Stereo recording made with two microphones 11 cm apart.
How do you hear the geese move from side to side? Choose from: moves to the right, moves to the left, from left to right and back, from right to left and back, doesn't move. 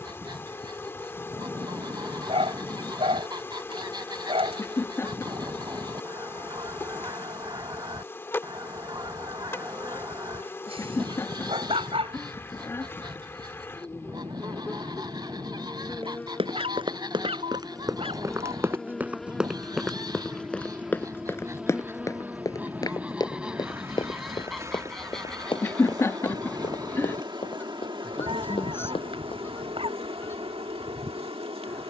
moves to the left.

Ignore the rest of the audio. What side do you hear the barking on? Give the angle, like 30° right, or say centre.
60° right.